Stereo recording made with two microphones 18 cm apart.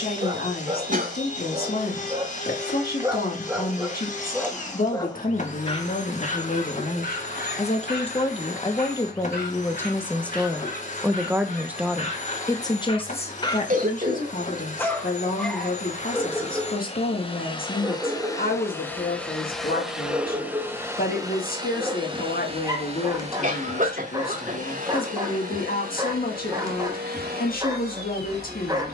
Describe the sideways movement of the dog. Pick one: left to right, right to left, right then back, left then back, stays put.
left then back.